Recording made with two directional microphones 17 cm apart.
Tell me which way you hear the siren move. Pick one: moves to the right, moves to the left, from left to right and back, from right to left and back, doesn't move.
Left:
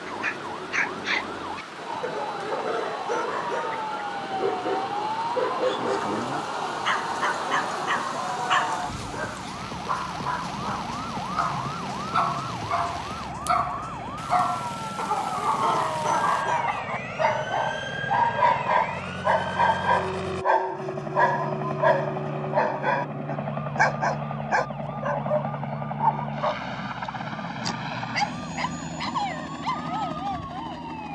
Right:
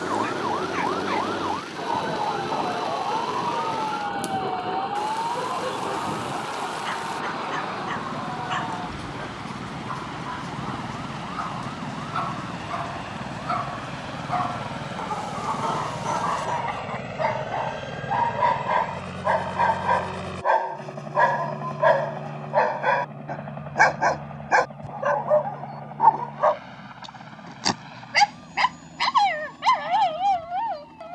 moves to the left.